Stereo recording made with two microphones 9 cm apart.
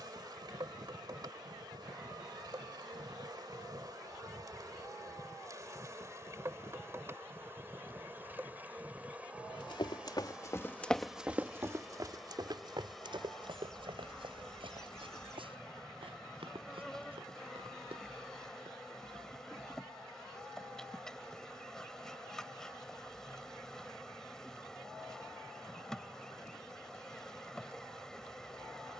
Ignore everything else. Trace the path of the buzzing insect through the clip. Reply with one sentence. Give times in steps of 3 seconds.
You can hear the buzzing insect on the right from 0 s and in the centre from 9 s.